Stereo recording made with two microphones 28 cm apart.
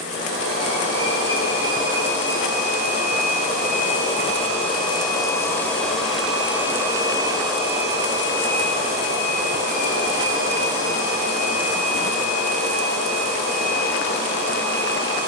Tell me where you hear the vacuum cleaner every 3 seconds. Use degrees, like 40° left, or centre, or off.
50° left, 20° left, 20° right, 50° right, 60° right.